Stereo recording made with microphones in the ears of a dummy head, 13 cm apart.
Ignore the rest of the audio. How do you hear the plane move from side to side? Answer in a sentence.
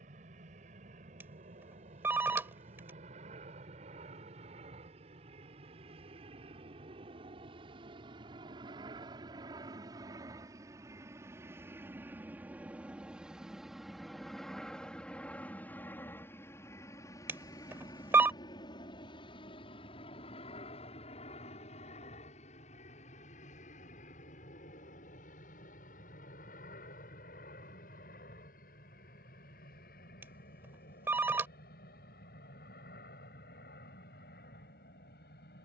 In this clip you hear the plane travel towards the left.